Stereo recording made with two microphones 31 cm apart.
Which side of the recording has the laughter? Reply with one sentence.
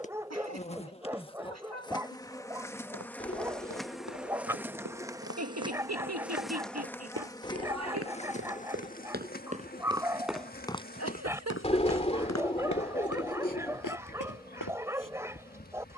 You can hear the laughter on the right.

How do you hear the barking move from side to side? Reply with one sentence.
In this clip you hear the barking stay put.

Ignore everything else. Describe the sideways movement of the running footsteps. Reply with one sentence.
In this clip you hear the running footsteps move to the left.